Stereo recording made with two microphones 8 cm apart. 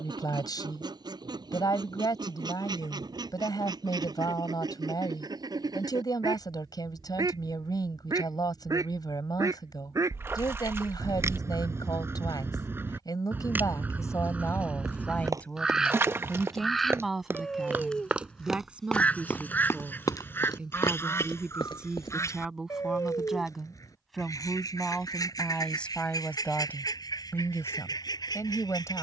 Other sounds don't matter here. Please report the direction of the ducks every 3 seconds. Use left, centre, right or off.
right, right, right, right, right, centre, left, left, left, left.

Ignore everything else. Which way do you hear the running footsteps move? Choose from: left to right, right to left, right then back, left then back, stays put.
right to left.